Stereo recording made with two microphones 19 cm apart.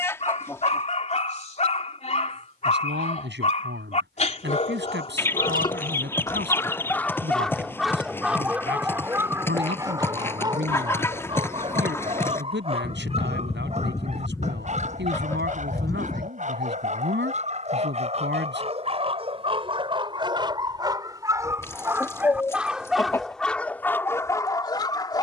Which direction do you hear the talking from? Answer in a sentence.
In this clip you hear the talking on the right.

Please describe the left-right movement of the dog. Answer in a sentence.
In this clip you hear the dog move from left to right and back again.